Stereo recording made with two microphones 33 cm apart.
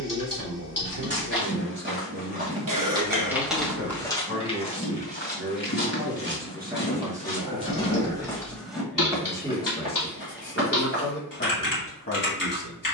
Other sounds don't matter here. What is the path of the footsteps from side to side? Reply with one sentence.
In this clip you hear the footsteps go left and come back.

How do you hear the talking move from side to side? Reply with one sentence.
You can hear the talking travel towards the left.